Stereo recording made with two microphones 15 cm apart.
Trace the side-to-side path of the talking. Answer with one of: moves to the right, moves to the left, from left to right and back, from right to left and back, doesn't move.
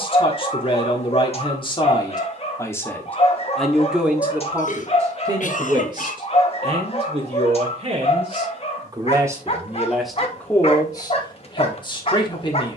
from left to right and back.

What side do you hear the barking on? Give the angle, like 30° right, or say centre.
40° left.